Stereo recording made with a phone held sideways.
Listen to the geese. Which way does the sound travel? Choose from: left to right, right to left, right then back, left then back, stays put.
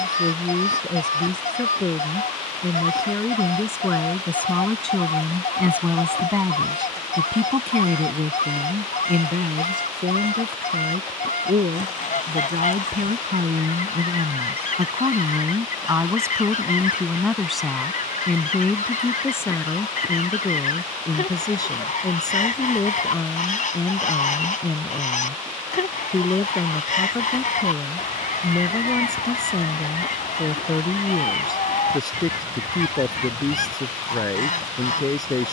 stays put.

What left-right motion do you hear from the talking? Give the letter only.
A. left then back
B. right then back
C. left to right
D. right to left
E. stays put
B.